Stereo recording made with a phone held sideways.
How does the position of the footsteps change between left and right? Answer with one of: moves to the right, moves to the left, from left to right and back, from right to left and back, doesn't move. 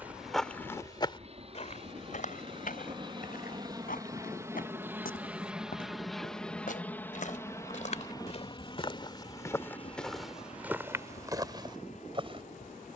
from right to left and back.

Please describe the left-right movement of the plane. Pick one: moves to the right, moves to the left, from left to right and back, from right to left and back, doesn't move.
moves to the left.